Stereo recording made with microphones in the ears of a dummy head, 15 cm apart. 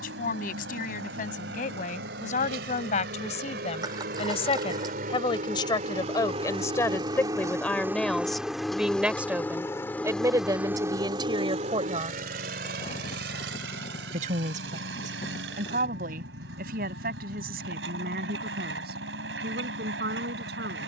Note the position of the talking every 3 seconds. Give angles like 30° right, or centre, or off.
50° left, 40° left, 10° left, 20° right, 50° right, 60° right, 70° right.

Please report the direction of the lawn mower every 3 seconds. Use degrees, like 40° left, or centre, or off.
80° right, 60° right, 20° right, 10° right, 70° right, 80° right, 80° right.